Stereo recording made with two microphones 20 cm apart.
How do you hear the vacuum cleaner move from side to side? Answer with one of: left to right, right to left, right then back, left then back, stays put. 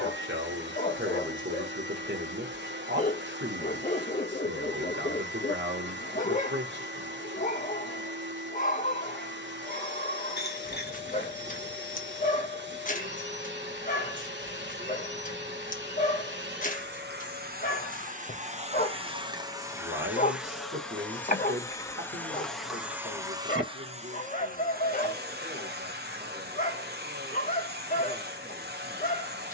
left then back.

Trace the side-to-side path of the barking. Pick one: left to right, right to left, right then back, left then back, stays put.
stays put.